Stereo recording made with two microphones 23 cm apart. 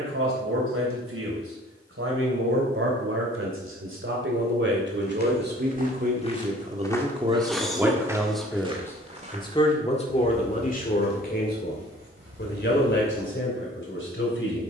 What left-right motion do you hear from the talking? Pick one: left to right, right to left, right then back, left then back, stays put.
right to left.